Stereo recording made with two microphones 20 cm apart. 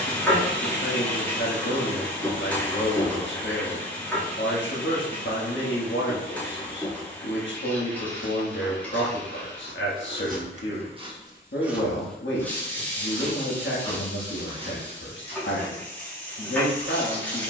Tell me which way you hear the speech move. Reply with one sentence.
You can hear the speech stay in one place.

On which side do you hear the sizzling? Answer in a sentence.
You can hear the sizzling in the centre.